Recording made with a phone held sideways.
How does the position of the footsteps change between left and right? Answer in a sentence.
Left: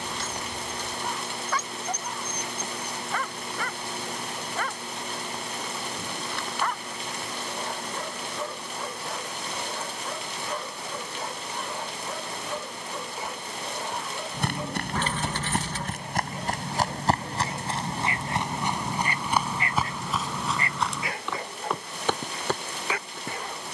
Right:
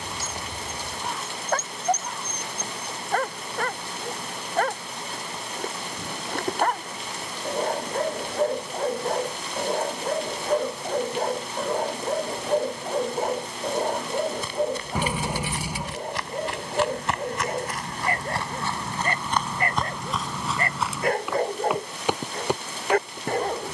You can hear the footsteps move from left to right.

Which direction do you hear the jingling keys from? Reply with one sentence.
You can hear the jingling keys in the centre.